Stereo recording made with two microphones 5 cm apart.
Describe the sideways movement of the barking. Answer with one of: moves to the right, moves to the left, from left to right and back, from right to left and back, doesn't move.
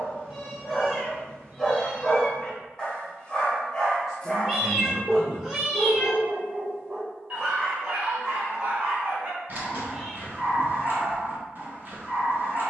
moves to the right.